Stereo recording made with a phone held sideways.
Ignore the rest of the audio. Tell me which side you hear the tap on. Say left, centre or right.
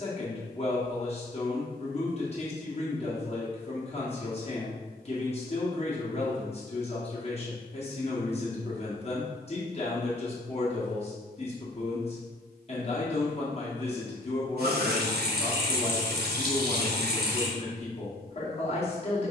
right.